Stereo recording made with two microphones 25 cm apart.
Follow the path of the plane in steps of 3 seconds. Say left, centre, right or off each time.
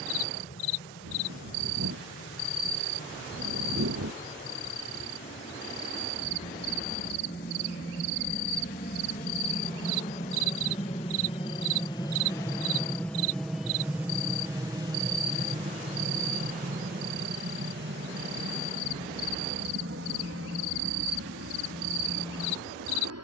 left, left, left, left, centre, right, right, right.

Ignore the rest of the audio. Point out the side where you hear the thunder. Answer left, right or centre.
right.